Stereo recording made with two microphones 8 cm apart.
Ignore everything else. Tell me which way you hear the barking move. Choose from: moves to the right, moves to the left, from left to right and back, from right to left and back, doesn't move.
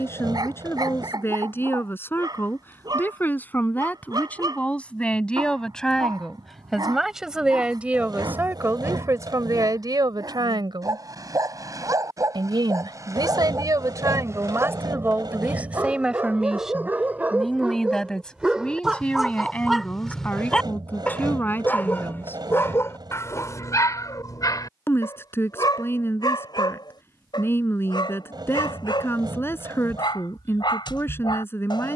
moves to the left.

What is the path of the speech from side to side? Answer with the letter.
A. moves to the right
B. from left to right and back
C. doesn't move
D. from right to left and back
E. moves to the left
B.